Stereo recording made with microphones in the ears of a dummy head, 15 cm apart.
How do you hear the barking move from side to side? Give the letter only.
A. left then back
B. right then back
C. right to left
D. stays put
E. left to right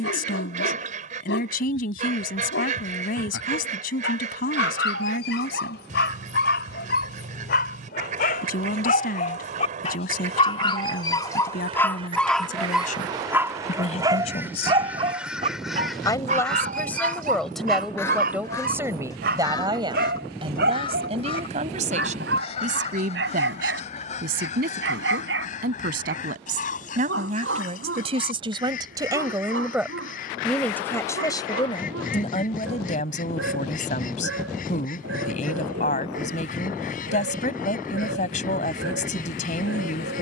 E.